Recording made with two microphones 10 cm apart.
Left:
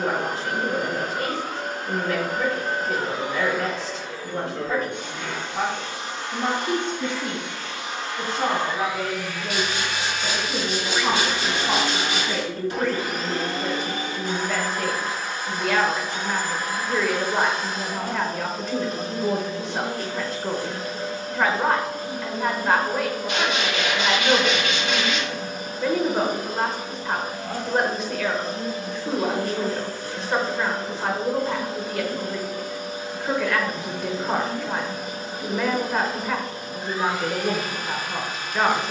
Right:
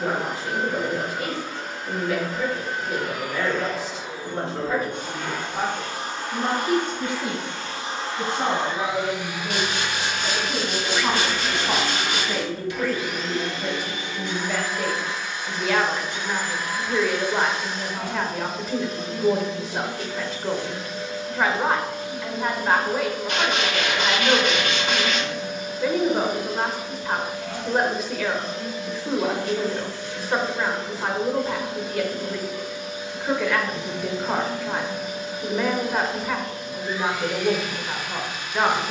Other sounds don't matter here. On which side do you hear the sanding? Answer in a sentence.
In this clip you hear the sanding on the right.